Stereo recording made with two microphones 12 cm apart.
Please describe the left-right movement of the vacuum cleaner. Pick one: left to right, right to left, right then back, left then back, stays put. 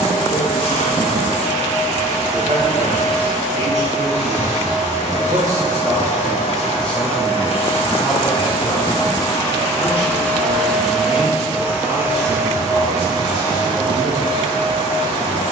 left to right.